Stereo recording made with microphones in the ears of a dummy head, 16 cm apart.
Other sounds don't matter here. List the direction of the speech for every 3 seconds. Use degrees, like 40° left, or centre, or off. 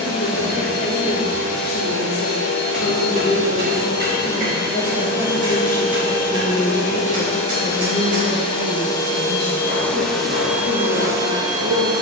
60° left, 30° left, 30° right, 60° right.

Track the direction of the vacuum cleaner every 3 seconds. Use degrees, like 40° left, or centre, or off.
60° left, 50° left, 30° left, 10° right.